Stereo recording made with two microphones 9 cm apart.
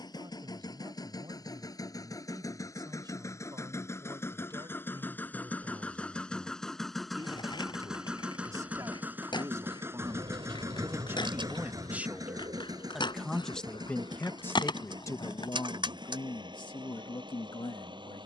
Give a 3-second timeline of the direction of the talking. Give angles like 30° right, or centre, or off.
60° right, 50° right, 50° right, 30° right, 10° left, 60° left.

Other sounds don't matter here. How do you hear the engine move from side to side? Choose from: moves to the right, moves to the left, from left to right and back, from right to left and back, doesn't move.
moves to the right.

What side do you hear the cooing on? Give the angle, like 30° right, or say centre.
70° right.